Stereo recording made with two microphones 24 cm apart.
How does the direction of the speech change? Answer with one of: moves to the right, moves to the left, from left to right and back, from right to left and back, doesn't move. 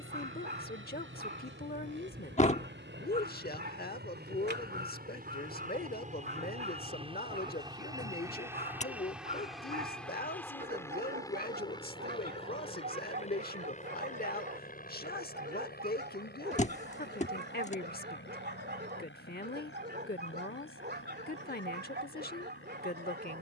doesn't move.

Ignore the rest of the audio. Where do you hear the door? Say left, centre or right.
left.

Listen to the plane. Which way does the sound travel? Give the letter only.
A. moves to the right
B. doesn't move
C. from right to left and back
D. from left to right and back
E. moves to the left
E.